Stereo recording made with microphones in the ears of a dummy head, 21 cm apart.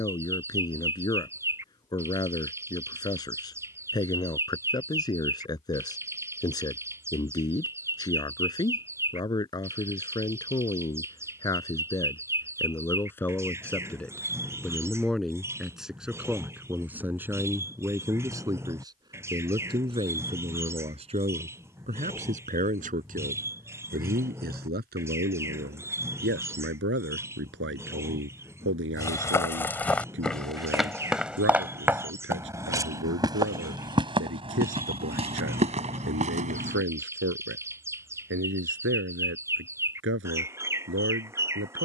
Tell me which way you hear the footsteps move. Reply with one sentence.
In this clip you hear the footsteps go from the left side to the right.